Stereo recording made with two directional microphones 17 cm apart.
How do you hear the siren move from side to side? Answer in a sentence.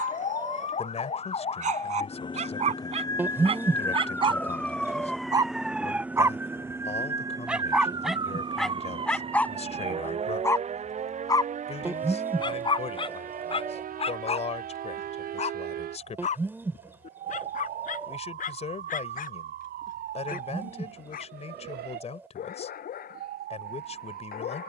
In this clip you hear the siren go from the left side to the right.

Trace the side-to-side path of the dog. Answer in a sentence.
You can hear the dog go from the right side to the left.